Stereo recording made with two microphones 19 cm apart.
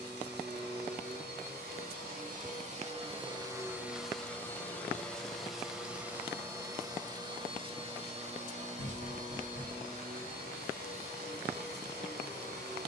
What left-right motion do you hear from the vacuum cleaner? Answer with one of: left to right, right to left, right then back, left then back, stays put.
left then back.